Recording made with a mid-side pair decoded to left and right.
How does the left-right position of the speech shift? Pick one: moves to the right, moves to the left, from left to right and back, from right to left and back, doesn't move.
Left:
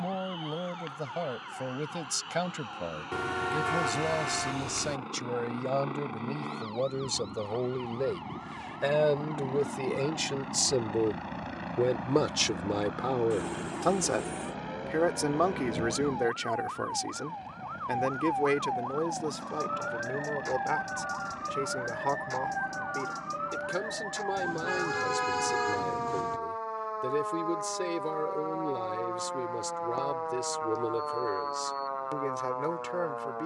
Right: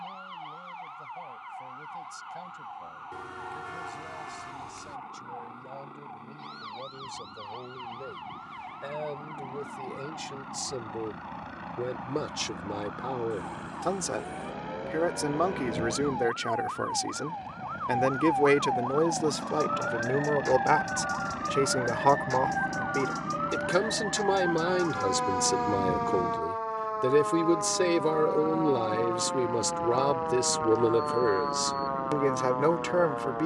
moves to the right.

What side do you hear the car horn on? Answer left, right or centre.
left.